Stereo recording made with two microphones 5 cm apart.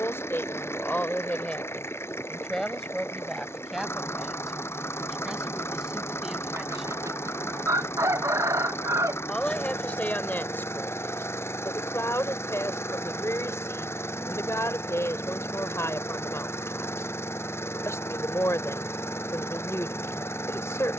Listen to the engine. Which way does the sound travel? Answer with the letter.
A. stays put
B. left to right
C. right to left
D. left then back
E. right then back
A.